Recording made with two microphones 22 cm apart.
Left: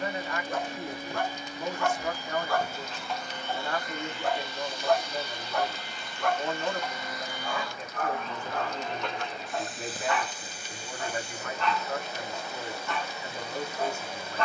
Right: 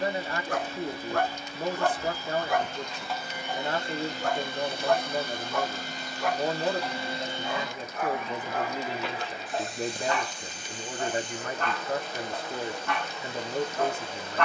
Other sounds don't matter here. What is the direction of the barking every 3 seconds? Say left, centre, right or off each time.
right, centre, centre, right, right.